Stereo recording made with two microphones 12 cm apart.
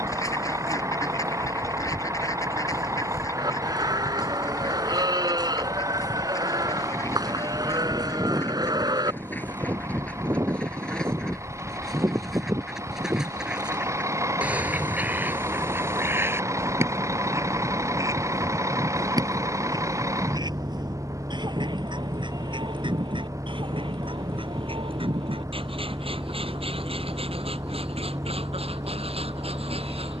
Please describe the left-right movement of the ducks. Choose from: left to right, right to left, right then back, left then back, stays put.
left to right.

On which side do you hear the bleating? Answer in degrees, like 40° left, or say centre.
40° right.